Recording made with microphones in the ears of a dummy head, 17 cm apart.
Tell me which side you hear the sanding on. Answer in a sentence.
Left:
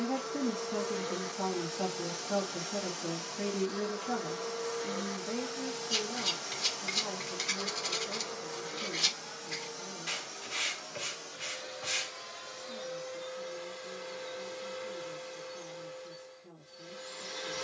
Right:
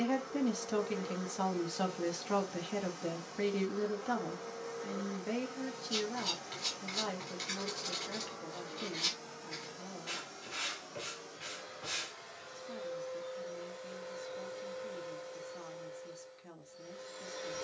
You can hear the sanding on the left.